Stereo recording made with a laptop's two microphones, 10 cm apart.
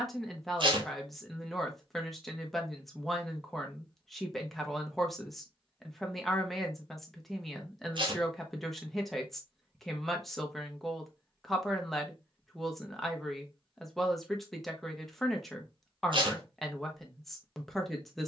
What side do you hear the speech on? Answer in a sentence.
You can hear the speech in the centre.